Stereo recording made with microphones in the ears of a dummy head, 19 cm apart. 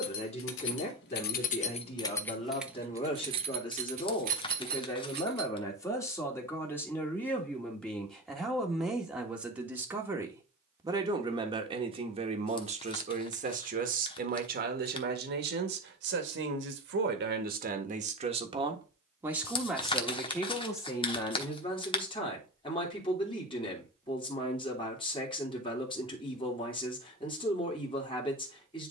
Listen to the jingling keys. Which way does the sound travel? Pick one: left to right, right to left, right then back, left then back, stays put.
left to right.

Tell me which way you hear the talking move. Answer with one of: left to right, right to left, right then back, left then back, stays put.
right then back.